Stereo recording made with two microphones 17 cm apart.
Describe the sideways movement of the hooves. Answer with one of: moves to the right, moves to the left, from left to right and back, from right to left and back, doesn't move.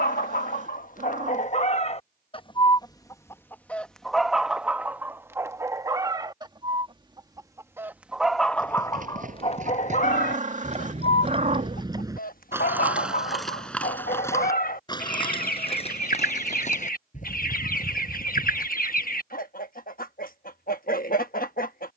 moves to the left.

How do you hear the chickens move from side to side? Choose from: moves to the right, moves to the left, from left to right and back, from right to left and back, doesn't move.
from left to right and back.